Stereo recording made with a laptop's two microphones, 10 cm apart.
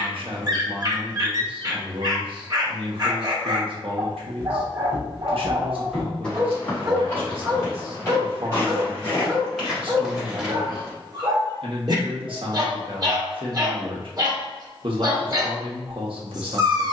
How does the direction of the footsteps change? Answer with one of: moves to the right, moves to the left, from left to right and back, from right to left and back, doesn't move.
from right to left and back.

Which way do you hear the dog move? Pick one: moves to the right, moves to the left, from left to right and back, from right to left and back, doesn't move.
doesn't move.